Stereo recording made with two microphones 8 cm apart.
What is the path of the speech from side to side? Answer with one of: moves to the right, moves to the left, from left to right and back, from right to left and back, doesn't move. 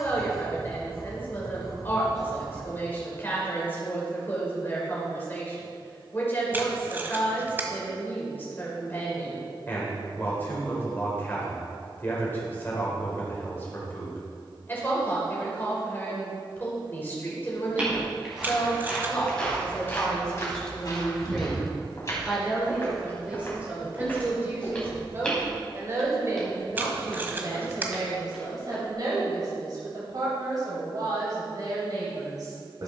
moves to the right.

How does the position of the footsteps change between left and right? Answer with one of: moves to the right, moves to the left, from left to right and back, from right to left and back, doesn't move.
from right to left and back.